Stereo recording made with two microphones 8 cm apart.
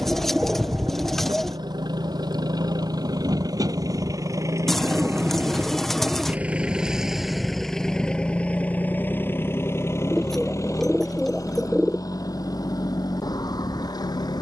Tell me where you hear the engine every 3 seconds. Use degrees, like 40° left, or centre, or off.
60° right, 40° right, centre, 40° left, 50° left.